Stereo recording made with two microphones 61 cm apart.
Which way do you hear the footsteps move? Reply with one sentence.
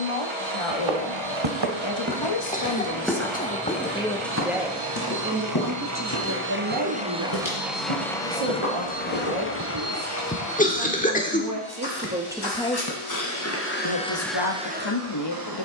In this clip you hear the footsteps move to the left.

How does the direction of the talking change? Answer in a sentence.
In this clip you hear the talking go right and come back.